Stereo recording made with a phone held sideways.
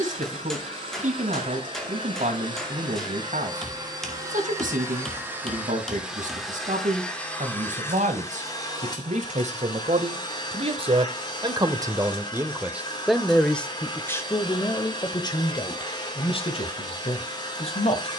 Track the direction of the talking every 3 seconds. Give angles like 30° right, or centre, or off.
70° right, 70° right, 70° right, 50° right, centre, 40° left.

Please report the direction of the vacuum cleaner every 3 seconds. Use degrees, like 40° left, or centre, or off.
40° right, 20° right, 10° left, 30° left, 30° left, 30° left.